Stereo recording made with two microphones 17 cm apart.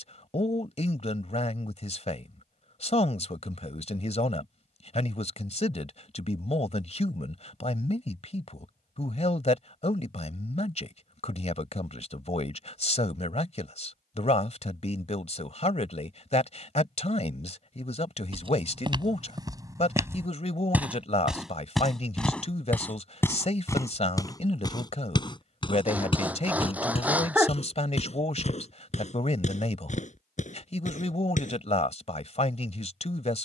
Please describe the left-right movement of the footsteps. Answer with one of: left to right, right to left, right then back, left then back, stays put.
right to left.